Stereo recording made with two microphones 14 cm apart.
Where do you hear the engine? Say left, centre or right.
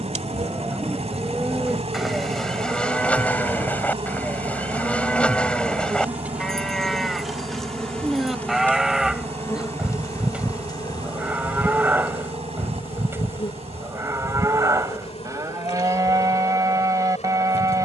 right.